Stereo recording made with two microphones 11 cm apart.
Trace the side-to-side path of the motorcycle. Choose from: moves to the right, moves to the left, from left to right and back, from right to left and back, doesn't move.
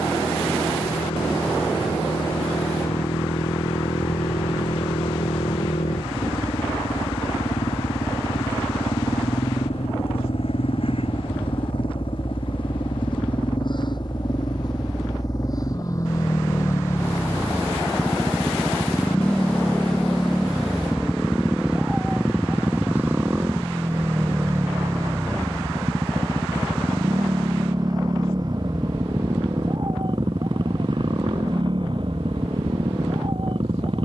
moves to the right.